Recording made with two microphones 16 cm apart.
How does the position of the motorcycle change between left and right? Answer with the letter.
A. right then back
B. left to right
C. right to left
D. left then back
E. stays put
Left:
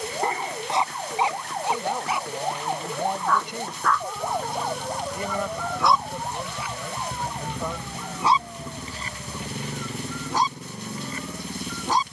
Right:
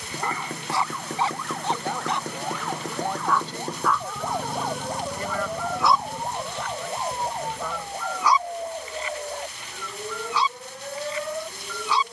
C.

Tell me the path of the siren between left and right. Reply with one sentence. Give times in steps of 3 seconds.
In this clip you hear the siren on the left from 0 s, in the centre from 3 s and on the right from 6 s.